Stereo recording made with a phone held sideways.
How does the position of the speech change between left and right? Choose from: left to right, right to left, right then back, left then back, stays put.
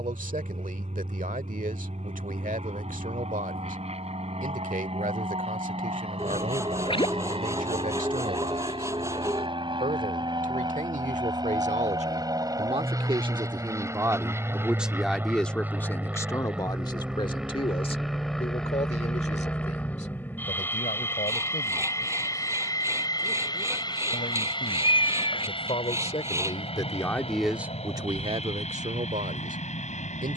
left then back.